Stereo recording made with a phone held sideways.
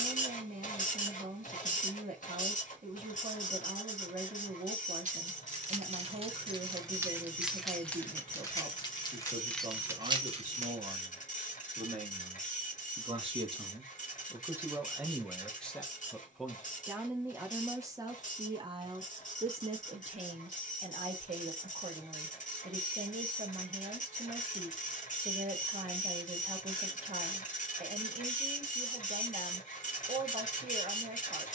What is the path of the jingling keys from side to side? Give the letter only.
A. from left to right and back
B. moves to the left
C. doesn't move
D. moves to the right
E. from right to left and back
E.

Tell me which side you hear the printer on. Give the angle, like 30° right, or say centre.
70° left.